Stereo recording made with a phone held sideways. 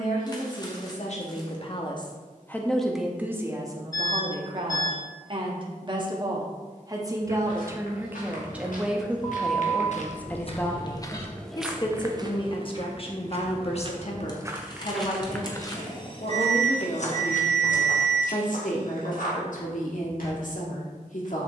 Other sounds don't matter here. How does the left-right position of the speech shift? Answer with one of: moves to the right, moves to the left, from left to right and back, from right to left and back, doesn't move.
from left to right and back.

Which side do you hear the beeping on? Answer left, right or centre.
left.